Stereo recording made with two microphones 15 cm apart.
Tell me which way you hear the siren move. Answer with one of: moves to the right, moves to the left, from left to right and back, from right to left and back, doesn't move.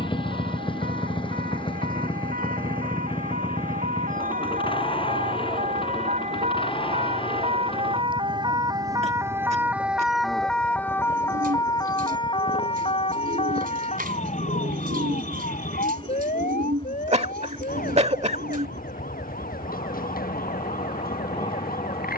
moves to the left.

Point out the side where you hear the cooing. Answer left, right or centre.
right.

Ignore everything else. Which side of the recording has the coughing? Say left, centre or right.
right.